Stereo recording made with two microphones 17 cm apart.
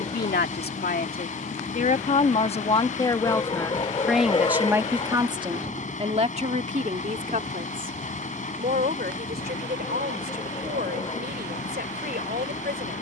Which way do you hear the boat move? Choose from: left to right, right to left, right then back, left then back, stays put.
stays put.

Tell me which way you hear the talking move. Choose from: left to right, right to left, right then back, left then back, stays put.
left to right.